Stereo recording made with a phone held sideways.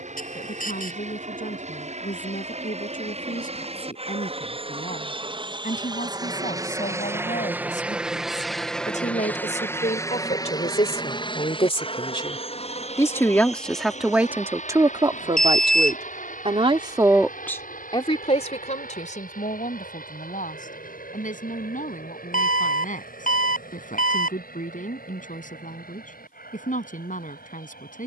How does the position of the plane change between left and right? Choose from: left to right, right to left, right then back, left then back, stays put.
right to left.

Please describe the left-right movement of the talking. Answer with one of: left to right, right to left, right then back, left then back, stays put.
right then back.